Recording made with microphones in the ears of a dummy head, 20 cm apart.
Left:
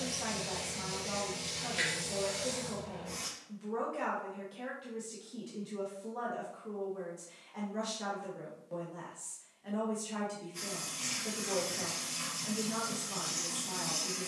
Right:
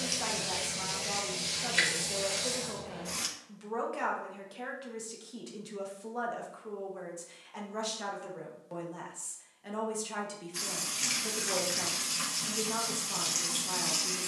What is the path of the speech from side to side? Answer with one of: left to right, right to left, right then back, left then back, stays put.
stays put.